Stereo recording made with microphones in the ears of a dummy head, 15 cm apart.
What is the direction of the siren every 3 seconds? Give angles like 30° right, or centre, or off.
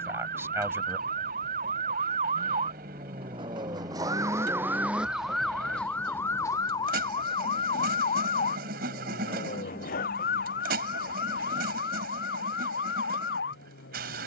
50° right, 10° right, 30° left, 60° left, 70° left.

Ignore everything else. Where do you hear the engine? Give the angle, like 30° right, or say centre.
60° right.